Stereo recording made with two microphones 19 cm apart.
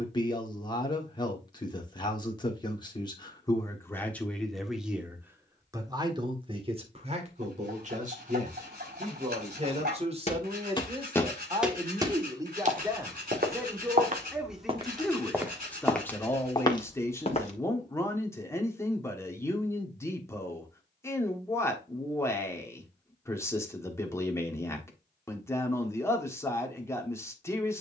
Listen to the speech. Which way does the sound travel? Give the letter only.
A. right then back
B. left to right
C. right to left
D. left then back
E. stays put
A.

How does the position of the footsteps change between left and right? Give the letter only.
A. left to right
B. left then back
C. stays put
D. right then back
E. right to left
D.